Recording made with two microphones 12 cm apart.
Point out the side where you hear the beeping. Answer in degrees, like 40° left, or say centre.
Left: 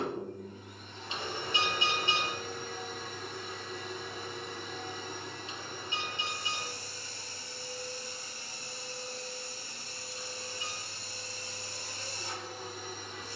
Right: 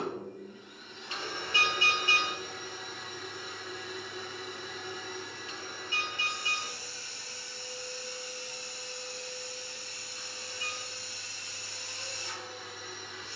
20° left.